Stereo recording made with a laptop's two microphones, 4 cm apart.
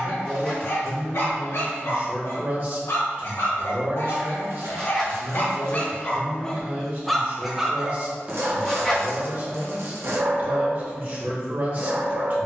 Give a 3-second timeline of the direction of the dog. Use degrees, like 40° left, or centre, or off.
70° left, 50° left, 10° right, 50° right.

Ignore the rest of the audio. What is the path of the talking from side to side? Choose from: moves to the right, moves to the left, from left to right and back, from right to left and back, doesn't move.
doesn't move.